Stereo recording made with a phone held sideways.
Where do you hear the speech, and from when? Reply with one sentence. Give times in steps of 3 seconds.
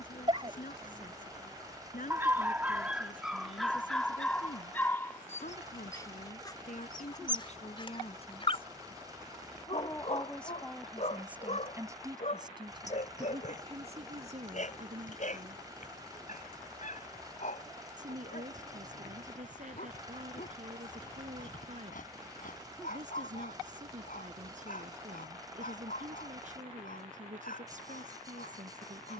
In this clip you hear the speech on the left from 0 s, in the centre from 9 s and on the right from 12 s.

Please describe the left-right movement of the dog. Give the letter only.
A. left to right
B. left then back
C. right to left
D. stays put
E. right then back
C.